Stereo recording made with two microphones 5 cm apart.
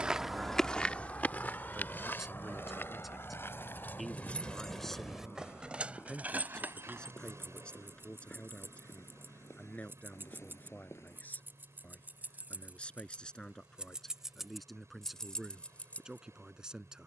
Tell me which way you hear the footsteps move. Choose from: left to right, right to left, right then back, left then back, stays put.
right to left.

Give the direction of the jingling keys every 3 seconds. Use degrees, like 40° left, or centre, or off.
off, 10° left, 40° right, 40° right, 20° right, 20° left.